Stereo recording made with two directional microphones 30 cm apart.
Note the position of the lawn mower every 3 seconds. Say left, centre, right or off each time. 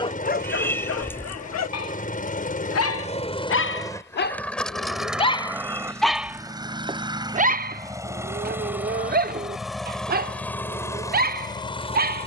left, centre, centre, centre.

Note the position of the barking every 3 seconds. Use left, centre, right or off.
left, left, right, right.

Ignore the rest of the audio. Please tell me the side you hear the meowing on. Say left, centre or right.
centre.